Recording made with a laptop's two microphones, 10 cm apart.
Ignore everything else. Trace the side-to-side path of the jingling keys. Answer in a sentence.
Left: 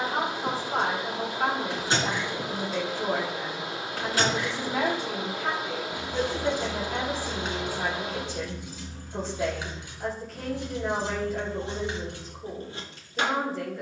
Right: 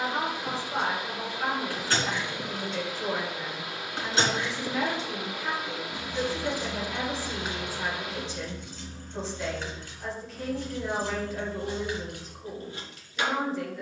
In this clip you hear the jingling keys go right and come back.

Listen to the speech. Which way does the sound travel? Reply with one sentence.
In this clip you hear the speech stay in one place.